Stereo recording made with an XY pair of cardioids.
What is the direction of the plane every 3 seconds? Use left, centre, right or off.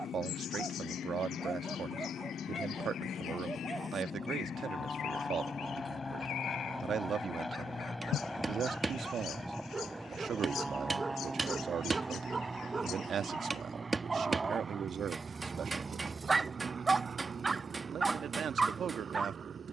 left, left, centre, centre, right, right, right.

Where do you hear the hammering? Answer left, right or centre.
right.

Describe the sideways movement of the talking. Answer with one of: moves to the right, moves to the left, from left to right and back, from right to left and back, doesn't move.
doesn't move.